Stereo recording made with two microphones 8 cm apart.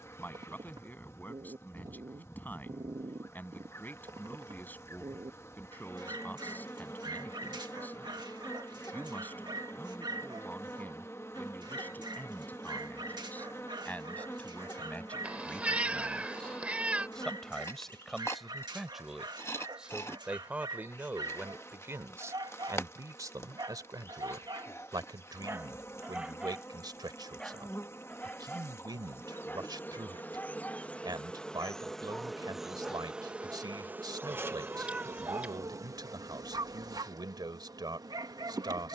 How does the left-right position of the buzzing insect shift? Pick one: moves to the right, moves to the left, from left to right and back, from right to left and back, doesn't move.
moves to the right.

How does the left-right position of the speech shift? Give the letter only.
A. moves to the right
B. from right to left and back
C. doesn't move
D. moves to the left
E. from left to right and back
A.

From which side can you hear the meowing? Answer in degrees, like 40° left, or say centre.
20° right.